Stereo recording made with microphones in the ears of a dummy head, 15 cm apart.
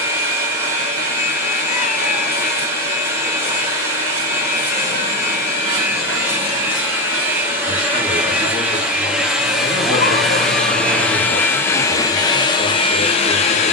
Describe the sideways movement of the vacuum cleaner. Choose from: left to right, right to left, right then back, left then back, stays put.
right to left.